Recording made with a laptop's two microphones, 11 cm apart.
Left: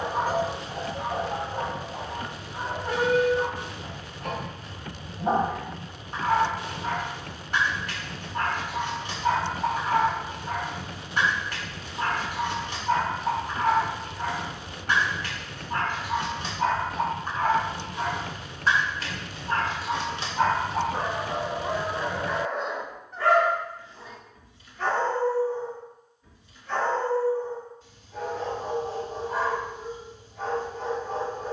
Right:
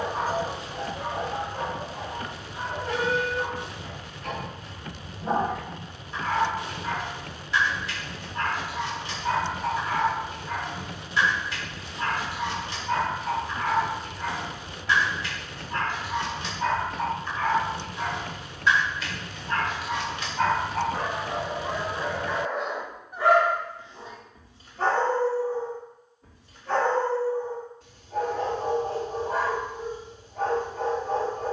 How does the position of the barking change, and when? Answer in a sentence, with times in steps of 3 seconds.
In this clip you hear the barking on the left from 0 s, in the centre from 21 s and on the right from 24 s.